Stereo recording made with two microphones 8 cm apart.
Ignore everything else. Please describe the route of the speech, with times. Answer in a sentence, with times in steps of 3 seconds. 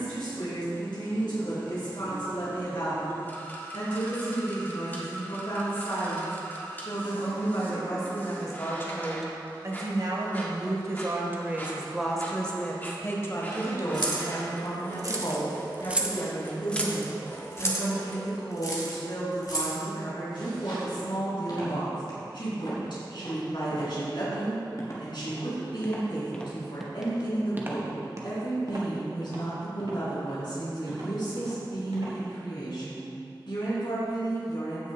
You can hear the speech on the left from 0 s, on the right from 9 s and on the left from 12 s.